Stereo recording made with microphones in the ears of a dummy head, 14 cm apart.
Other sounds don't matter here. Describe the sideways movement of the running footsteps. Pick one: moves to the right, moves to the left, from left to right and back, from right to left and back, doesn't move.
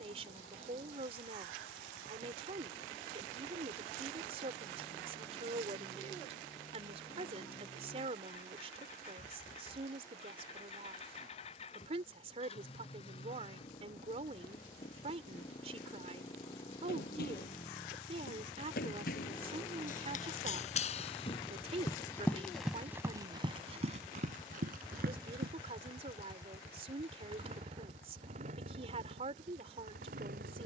moves to the right.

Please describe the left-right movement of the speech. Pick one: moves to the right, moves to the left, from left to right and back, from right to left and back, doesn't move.
doesn't move.